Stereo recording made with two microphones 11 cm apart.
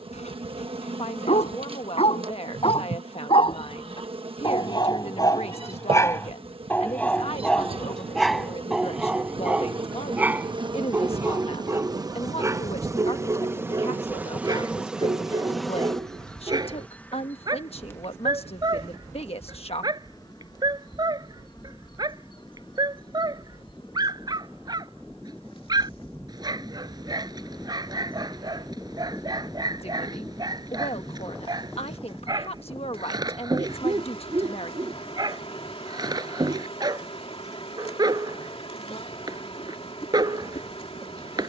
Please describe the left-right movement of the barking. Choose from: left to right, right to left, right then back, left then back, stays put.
left to right.